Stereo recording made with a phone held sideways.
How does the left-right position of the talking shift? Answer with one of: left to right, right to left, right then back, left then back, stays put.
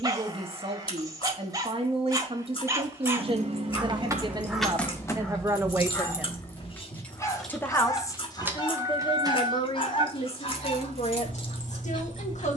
right to left.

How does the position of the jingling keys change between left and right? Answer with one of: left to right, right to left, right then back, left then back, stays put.
left then back.